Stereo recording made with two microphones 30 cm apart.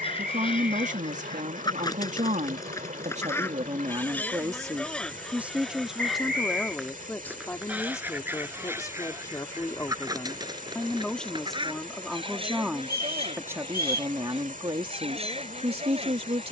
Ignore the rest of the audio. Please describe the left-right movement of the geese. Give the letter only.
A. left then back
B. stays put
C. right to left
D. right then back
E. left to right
E.